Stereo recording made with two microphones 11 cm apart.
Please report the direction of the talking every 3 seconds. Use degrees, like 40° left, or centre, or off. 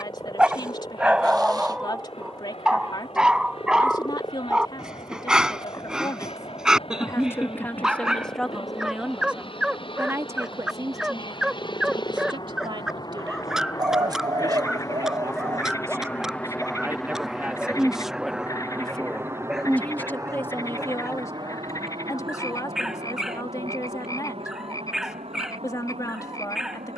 40° left, 40° left, 20° left, 20° right, 40° right, 20° right, 10° left, 30° left, 30° left.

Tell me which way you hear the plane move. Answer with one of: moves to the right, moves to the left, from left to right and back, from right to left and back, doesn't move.
moves to the right.